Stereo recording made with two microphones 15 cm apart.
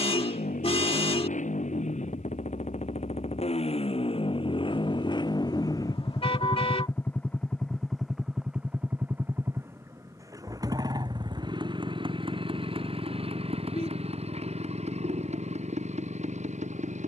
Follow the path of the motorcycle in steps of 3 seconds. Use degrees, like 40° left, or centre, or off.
60° left, 40° left, 10° left, 20° right, 40° right, 50° right.